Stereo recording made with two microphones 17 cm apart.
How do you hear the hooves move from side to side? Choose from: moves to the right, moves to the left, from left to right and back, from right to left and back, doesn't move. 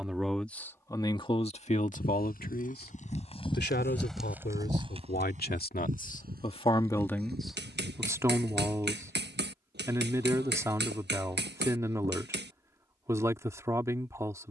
moves to the right.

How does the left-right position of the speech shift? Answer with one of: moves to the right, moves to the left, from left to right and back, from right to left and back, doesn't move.
from right to left and back.